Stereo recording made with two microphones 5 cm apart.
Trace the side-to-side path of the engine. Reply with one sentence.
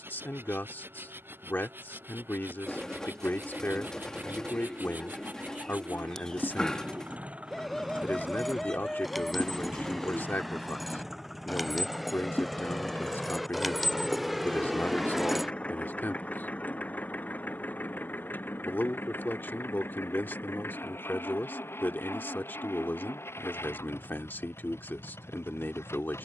In this clip you hear the engine go from the right side to the left.